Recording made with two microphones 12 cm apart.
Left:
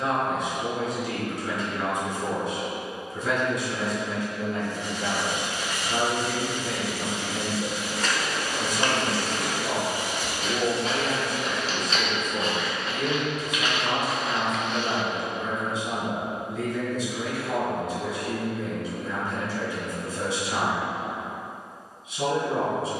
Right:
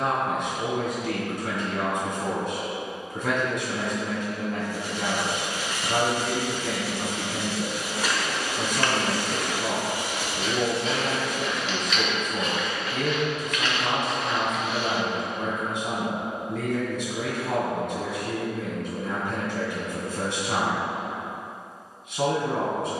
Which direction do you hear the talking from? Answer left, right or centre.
right.